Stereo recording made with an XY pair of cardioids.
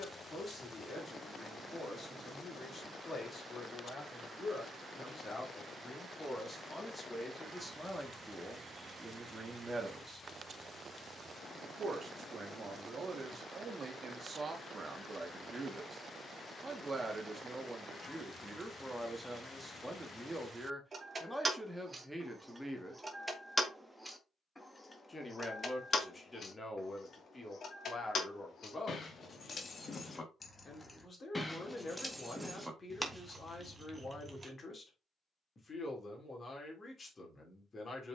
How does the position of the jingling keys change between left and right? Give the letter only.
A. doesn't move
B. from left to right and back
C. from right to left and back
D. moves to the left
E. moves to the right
C.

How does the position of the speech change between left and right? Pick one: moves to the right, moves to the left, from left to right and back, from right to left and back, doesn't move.
from left to right and back.